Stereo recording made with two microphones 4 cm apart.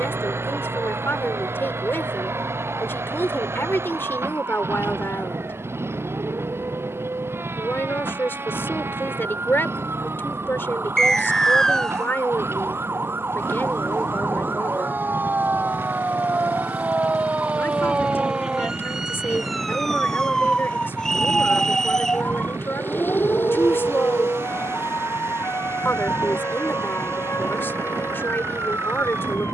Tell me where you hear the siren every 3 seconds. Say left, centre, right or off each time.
right, right, right, right, right, right, centre, left, left, left.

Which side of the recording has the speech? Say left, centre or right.
left.